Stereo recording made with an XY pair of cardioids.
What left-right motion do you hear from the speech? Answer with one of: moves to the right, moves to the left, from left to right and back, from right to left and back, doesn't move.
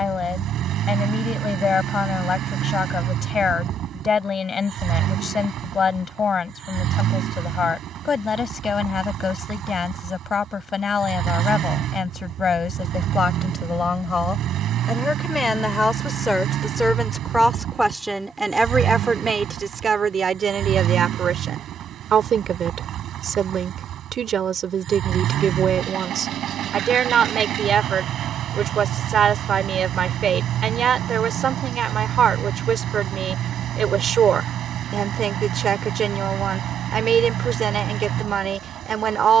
moves to the right.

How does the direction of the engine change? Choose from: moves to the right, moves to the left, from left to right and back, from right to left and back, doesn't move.
doesn't move.